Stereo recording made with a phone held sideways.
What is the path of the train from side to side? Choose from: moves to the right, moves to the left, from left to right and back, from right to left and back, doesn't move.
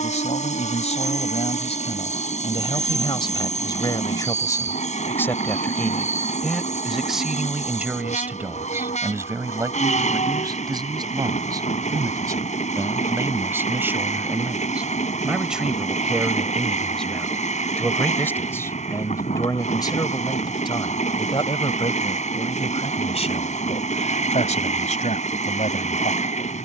doesn't move.